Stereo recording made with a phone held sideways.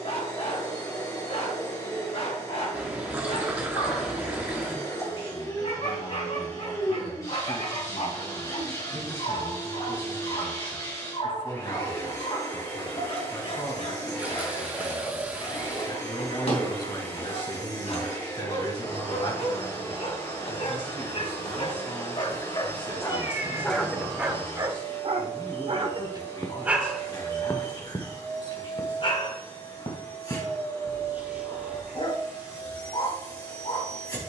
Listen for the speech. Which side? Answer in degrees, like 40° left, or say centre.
40° left.